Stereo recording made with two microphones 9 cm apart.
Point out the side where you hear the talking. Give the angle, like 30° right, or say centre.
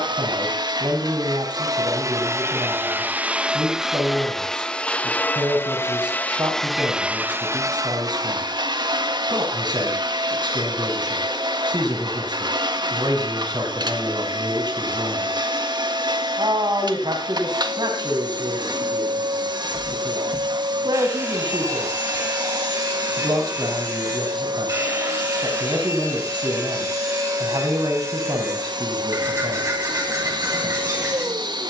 60° right.